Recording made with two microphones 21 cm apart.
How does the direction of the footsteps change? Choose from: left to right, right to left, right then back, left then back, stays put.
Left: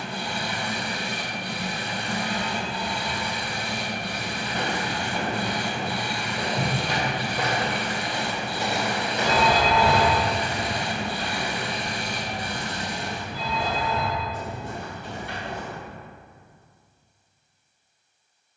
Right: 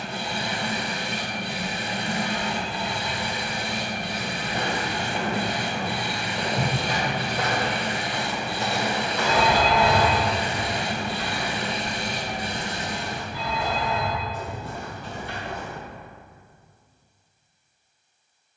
right to left.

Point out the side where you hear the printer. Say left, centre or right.
right.